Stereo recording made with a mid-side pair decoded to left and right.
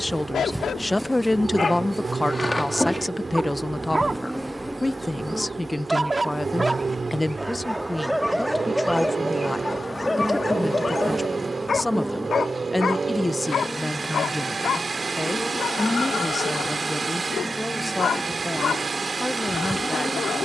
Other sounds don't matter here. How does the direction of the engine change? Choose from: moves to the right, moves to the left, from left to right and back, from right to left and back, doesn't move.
doesn't move.